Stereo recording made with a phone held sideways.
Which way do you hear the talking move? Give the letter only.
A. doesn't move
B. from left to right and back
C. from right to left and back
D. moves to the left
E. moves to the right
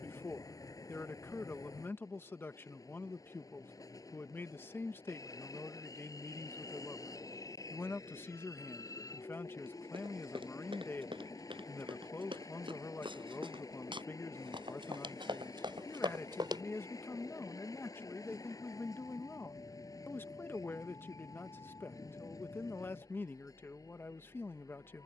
A.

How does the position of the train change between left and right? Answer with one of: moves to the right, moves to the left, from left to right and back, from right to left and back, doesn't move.
doesn't move.